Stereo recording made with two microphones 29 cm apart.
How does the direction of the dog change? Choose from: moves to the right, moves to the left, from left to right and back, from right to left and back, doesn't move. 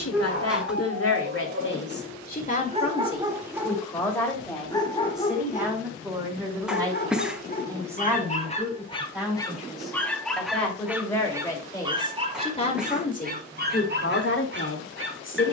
from right to left and back.